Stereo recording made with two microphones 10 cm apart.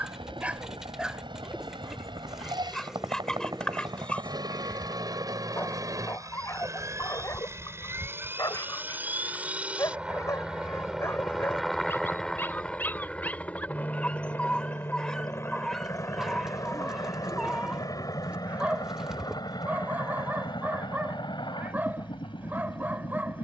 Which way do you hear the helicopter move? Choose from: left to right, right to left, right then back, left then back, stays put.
right to left.